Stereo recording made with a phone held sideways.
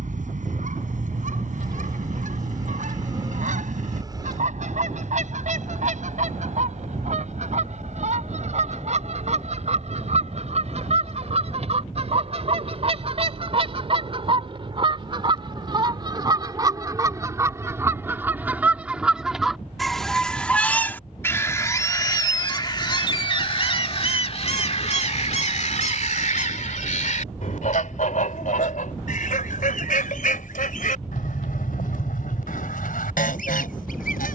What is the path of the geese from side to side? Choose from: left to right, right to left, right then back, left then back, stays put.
right to left.